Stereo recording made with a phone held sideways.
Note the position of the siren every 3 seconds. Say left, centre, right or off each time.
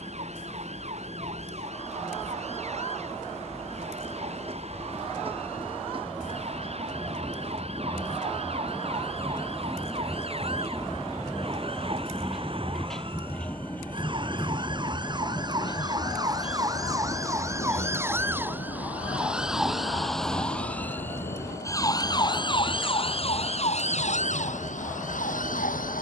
right, right, right, right, right, right, centre, left, left.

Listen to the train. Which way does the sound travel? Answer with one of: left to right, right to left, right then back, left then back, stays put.
right to left.